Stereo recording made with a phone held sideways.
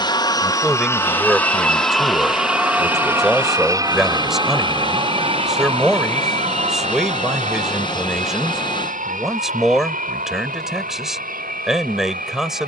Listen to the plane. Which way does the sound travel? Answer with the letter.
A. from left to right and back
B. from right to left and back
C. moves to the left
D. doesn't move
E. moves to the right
E.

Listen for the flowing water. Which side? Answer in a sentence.
In this clip you hear the flowing water on the left.